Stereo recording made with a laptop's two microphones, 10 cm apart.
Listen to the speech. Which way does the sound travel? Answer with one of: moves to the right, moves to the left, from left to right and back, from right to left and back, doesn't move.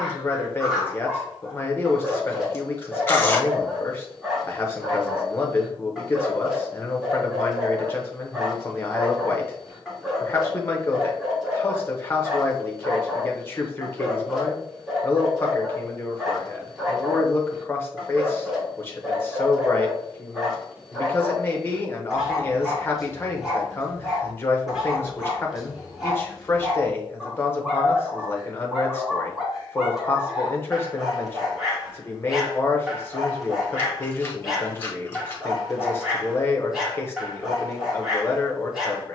doesn't move.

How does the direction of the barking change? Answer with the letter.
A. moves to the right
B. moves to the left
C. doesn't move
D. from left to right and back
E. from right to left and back
C.